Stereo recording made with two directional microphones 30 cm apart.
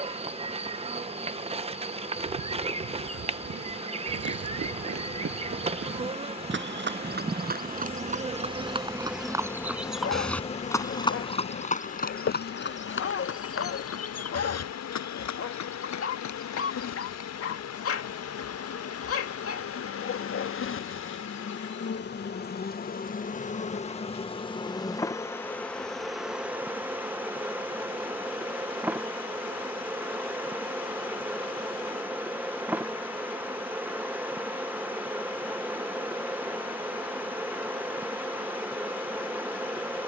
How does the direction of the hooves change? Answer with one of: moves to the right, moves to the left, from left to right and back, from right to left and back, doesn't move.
moves to the left.